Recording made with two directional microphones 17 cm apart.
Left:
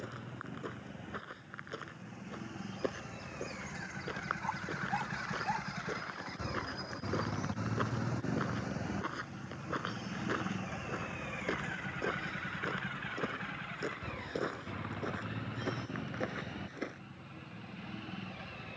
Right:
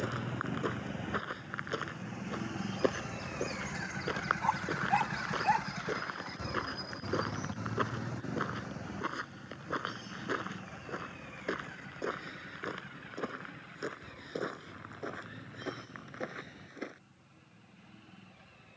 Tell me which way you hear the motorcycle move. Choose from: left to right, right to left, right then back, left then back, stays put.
right to left.